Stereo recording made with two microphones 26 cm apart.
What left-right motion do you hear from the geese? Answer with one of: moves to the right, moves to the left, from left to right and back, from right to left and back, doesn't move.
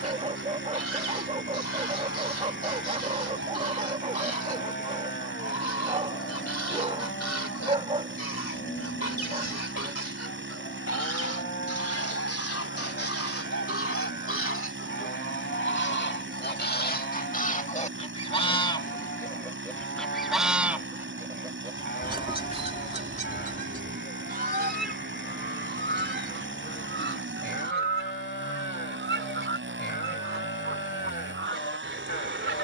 moves to the right.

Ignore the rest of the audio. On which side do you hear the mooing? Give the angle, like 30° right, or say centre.
40° left.